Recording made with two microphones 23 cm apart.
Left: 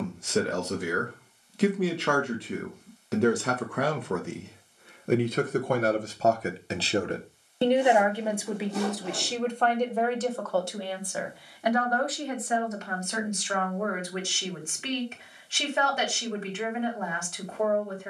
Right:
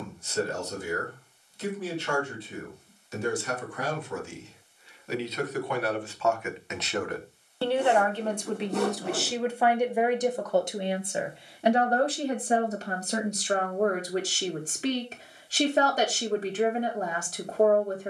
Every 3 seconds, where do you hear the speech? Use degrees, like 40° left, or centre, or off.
70° left, 60° left, 20° left, 20° right, 30° right, 40° right.